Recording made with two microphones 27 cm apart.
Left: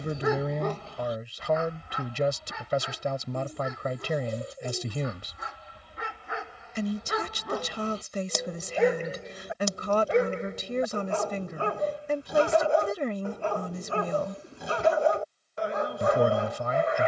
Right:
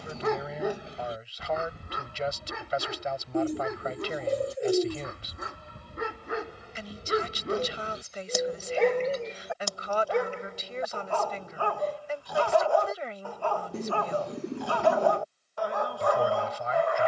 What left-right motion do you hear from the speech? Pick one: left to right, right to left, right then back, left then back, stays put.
stays put.